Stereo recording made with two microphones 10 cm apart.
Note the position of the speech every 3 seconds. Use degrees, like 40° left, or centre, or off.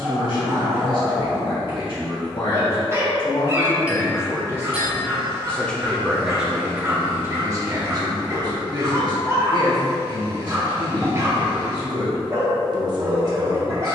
50° left, 30° left, 30° right, 40° right, 40° right.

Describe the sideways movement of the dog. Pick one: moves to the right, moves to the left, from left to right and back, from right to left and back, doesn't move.
doesn't move.